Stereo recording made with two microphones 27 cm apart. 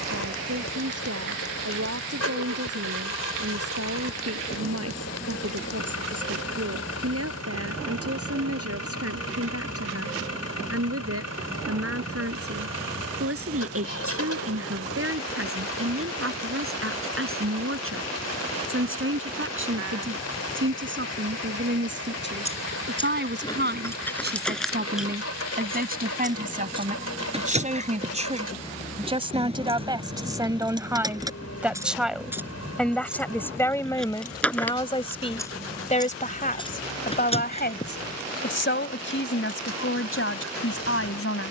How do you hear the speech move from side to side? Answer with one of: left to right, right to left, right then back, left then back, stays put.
right to left.